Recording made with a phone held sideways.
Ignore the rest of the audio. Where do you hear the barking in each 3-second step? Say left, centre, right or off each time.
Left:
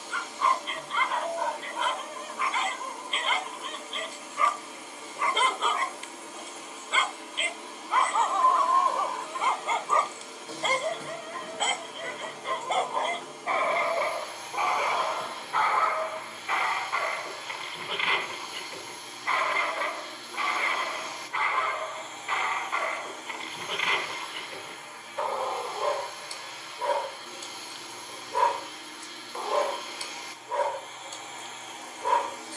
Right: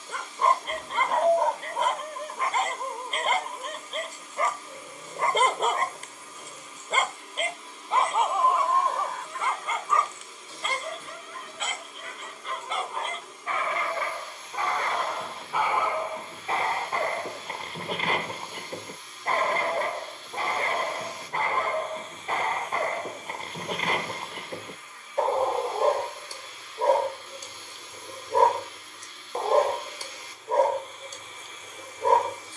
right, right, right, left, left, right, right, right, right, right, right.